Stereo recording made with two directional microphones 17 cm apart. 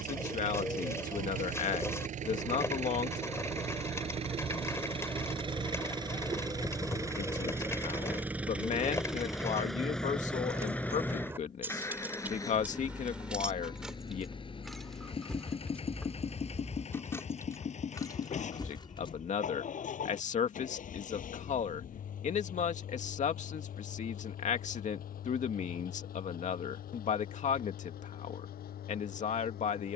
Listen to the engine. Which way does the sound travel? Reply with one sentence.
In this clip you hear the engine travel towards the left.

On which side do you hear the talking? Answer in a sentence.
In this clip you hear the talking on the left.